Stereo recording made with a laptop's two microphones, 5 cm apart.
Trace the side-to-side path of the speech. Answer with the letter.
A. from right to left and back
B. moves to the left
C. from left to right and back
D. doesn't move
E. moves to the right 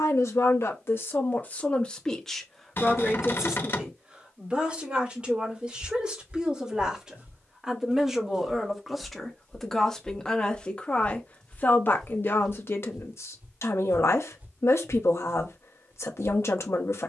C.